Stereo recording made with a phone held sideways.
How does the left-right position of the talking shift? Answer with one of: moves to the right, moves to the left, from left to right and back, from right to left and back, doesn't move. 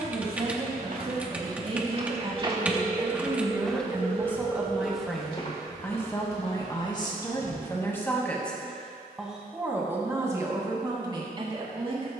from right to left and back.